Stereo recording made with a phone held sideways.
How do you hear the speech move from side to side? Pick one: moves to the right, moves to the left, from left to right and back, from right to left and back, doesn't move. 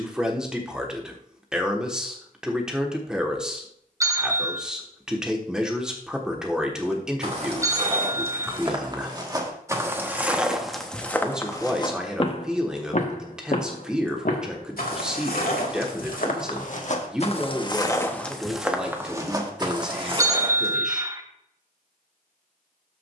doesn't move.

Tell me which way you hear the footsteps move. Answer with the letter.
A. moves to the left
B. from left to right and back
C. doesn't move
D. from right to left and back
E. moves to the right
D.